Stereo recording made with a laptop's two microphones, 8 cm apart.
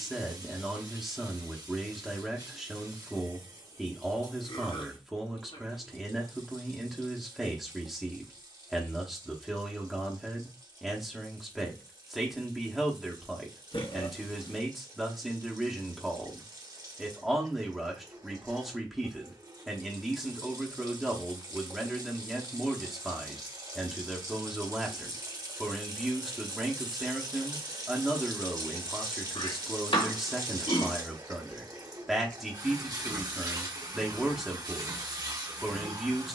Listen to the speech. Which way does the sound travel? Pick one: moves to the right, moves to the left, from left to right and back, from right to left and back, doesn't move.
doesn't move.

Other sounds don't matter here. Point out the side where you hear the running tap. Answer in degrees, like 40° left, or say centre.
50° right.